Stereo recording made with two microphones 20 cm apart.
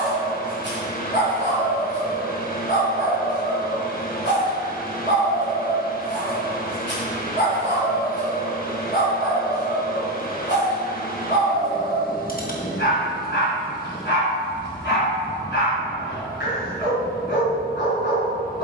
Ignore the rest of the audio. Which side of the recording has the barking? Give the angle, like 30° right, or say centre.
60° left.